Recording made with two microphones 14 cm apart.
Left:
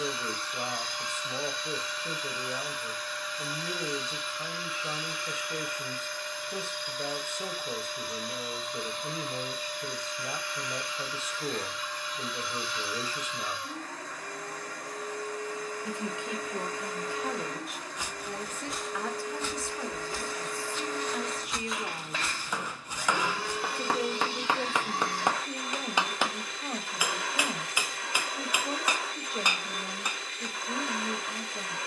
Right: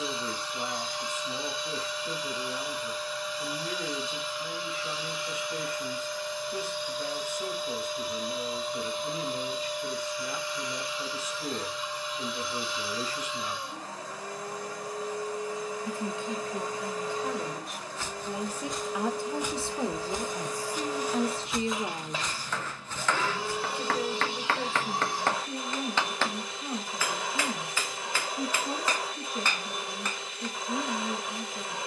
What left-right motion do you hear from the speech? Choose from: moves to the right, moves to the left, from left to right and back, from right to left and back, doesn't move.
from left to right and back.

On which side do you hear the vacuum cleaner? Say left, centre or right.
centre.